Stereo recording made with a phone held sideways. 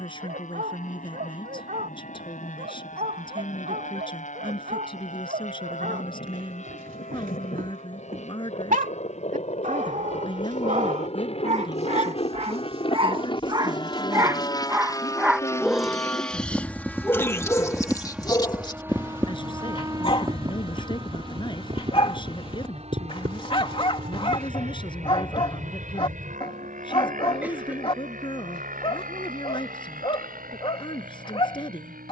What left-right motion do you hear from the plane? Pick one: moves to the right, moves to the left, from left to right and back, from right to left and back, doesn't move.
moves to the right.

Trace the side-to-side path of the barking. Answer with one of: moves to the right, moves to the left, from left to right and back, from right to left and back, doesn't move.
moves to the left.